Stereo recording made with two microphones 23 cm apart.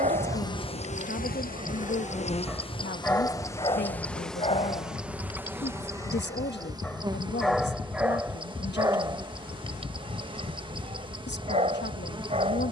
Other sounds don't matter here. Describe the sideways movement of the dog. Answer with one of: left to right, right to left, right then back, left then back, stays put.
left then back.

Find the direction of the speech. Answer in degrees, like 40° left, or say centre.
50° left.